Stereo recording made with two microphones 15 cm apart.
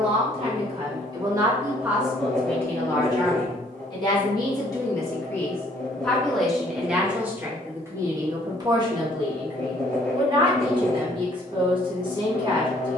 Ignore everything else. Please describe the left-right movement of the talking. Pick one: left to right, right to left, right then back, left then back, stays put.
left then back.